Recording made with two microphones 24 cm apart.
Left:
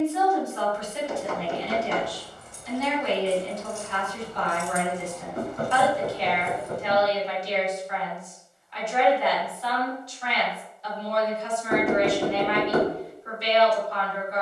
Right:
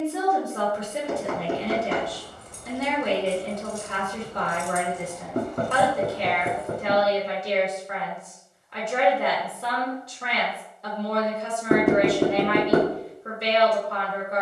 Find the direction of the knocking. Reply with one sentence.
In this clip you hear the knocking on the right.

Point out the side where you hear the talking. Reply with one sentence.
In this clip you hear the talking on the right.